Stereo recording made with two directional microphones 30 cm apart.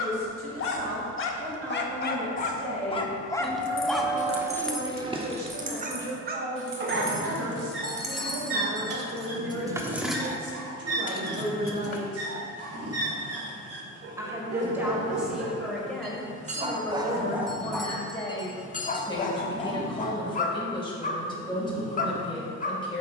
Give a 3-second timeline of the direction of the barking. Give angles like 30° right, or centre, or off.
40° left, 10° right, 40° right, 60° right, 50° right, 20° right, 30° left, 30° left.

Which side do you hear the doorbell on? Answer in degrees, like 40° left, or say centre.
centre.